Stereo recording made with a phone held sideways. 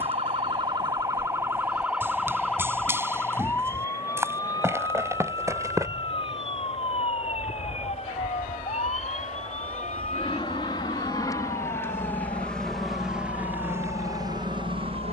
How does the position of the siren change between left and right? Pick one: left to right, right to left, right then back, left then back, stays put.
right to left.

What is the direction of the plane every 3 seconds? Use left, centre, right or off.
left, left, left, left, centre.